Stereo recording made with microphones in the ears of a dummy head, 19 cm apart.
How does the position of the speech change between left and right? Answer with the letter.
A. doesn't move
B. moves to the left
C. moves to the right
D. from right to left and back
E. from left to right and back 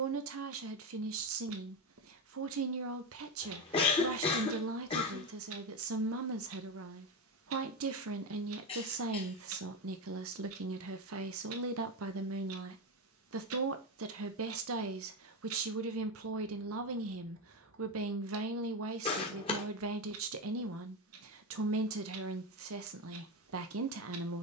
A.